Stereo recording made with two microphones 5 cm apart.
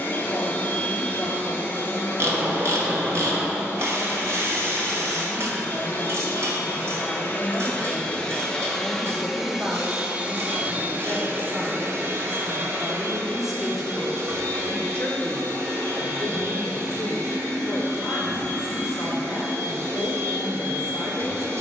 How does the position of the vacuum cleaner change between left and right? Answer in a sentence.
In this clip you hear the vacuum cleaner move from left to right.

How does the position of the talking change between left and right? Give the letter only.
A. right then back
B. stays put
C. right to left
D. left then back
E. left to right
A.